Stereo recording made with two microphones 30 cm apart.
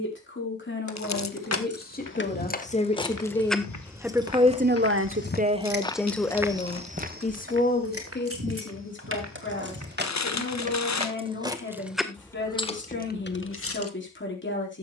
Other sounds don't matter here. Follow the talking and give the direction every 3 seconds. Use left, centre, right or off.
left, centre, left, left, left.